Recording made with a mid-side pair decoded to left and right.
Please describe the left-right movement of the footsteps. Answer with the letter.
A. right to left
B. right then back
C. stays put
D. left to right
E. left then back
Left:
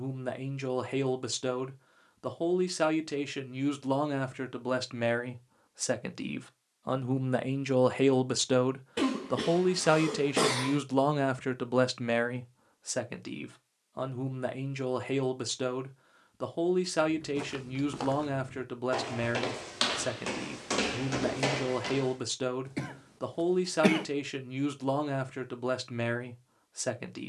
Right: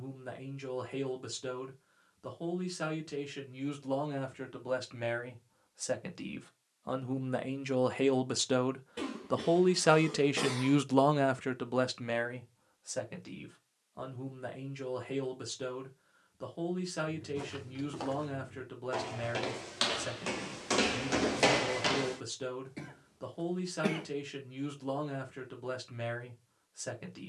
D.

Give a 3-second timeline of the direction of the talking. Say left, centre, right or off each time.
left, left, left, centre, left, left, left, left, left.